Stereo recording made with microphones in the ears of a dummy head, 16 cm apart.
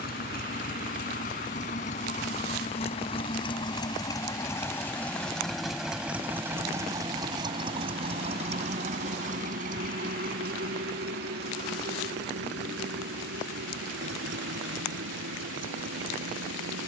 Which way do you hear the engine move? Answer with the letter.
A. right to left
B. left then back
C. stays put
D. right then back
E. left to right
E.